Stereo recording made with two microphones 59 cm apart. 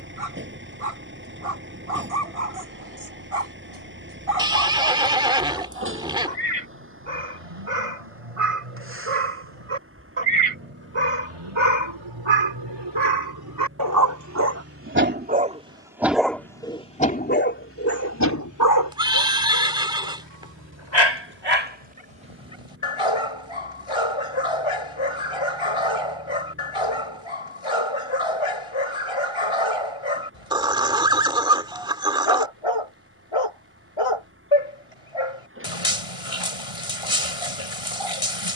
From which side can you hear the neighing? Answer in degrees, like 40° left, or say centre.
10° right.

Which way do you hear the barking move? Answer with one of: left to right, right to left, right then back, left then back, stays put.
right to left.